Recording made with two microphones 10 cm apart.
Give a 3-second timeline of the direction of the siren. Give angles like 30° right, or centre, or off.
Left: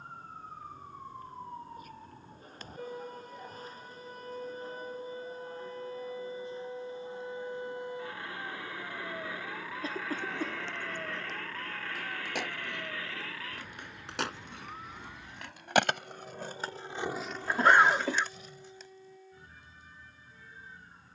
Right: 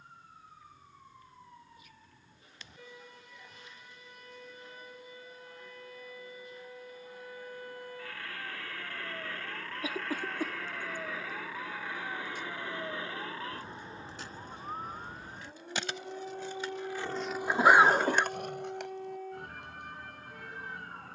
50° left, 40° left, 20° left, centre, 20° right, 50° right, 60° right.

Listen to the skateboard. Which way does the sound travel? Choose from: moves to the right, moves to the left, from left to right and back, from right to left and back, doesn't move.
moves to the right.